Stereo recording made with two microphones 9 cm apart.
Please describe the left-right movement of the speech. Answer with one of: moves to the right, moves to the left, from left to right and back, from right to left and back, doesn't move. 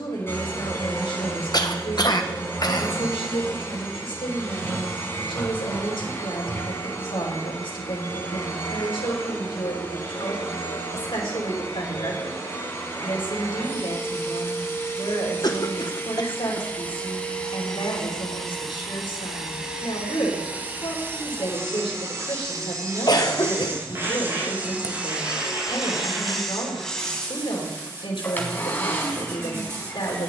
doesn't move.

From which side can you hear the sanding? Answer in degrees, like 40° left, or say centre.
30° right.